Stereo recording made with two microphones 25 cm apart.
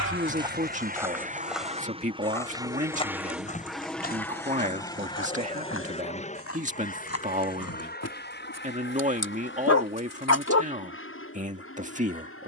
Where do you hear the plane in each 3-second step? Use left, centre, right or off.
right, centre, left, left.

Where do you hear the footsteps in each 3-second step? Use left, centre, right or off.
centre, left, left, off.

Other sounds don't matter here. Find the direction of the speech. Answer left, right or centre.
right.